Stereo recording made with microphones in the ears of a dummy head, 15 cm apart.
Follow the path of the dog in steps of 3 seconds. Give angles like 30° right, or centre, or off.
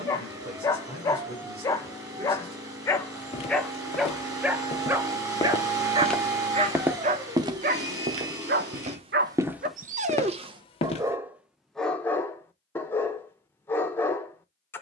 20° left, 10° right, 40° right, 30° right, 10° left.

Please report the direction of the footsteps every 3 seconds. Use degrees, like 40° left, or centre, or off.
off, 30° left, 20° right, 10° left, off.